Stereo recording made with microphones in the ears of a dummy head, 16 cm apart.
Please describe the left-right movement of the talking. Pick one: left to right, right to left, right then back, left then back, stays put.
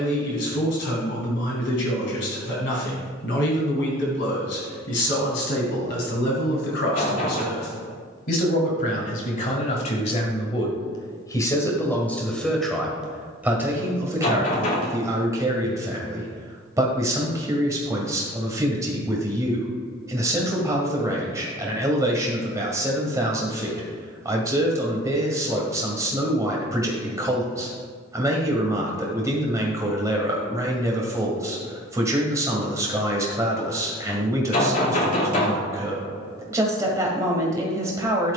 left to right.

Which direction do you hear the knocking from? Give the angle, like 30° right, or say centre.
40° left.